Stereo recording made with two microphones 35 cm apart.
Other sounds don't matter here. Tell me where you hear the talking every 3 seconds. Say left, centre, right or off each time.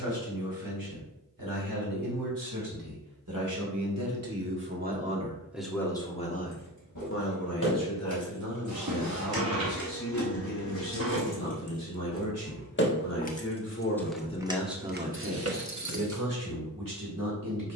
right, right, left, left, left, right.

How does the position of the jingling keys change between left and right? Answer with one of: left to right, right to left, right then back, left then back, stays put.
left to right.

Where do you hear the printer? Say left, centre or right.
right.